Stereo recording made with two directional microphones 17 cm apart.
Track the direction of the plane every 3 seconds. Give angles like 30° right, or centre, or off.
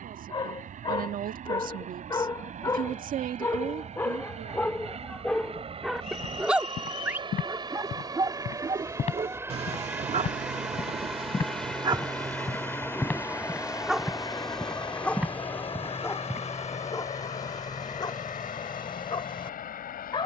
50° right, 40° right, 30° right, 10° right, 20° left, 40° left, 50° left.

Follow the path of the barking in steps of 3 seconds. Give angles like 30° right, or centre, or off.
20° left, 10° left, 20° right, 40° right, 10° right, 20° left, 30° left.